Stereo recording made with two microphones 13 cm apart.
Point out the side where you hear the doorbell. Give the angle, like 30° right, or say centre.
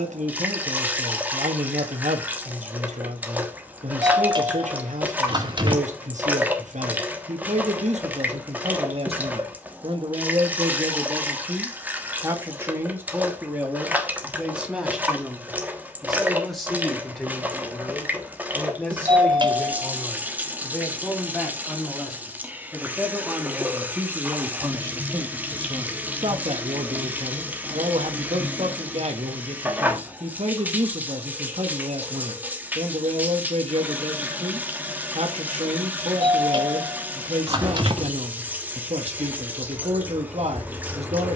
40° right.